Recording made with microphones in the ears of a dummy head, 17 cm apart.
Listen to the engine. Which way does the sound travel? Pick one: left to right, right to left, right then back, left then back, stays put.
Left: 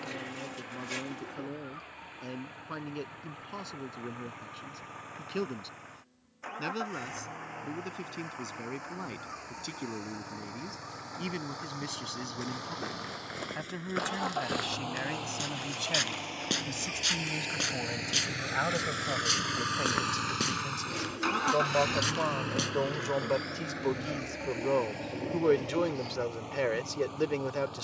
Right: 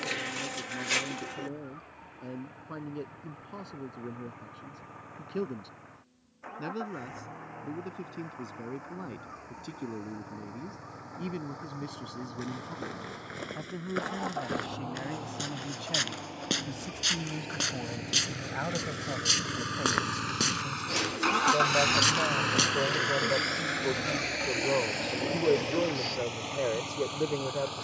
left to right.